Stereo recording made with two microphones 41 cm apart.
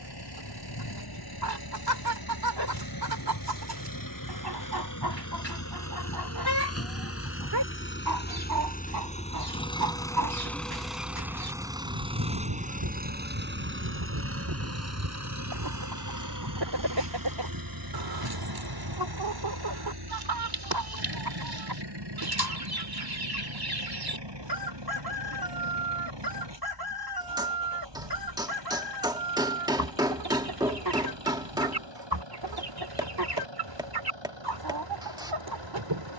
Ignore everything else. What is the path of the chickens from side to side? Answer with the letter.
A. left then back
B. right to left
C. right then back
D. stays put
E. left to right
D.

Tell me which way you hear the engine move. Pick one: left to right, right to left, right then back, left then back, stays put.
left to right.